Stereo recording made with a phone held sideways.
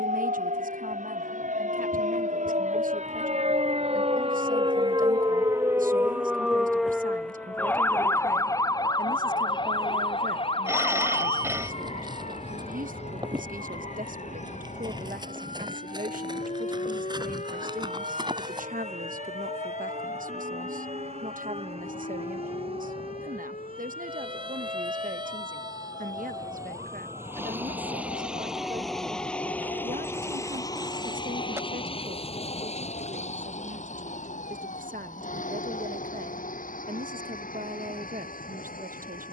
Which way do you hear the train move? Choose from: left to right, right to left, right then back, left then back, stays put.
right to left.